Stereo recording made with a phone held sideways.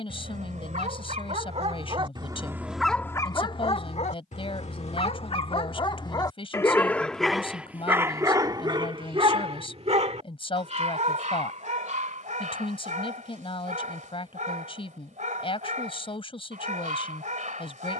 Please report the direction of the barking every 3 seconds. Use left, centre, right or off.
right, left, centre, right, right, right.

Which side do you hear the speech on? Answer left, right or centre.
left.